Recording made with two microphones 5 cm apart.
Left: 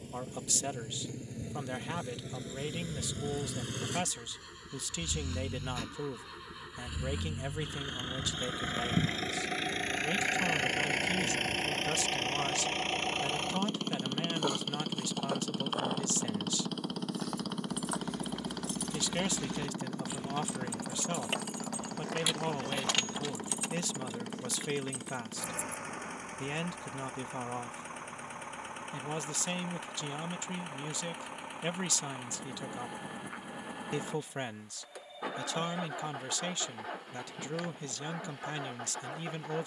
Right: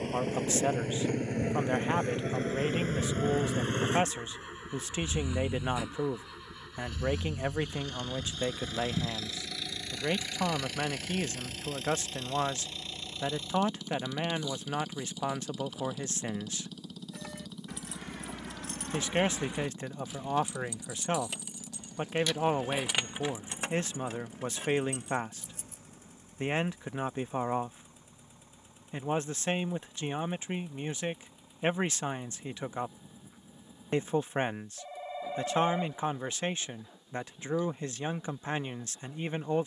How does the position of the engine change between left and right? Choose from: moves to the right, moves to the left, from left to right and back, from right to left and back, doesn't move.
moves to the left.